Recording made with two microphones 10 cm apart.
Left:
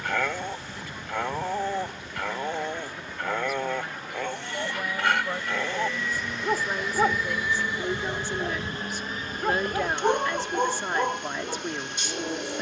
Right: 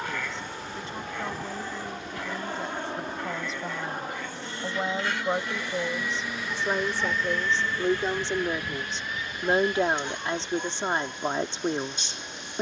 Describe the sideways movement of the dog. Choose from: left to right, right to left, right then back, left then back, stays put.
stays put.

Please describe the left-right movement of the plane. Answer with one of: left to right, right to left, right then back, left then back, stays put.
right to left.